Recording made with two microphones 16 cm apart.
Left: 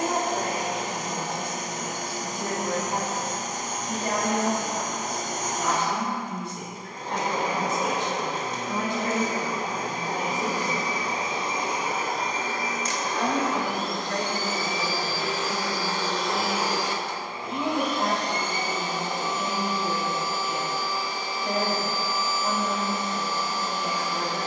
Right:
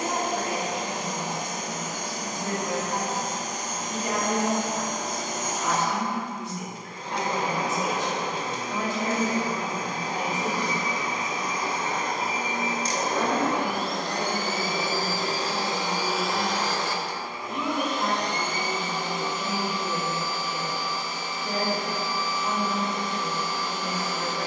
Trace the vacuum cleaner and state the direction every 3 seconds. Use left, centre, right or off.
left, left, left, left, right, centre, left, left.